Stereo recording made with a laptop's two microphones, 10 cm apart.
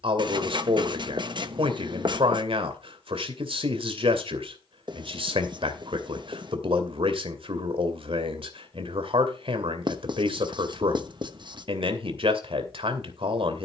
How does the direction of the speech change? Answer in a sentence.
In this clip you hear the speech stay in one place.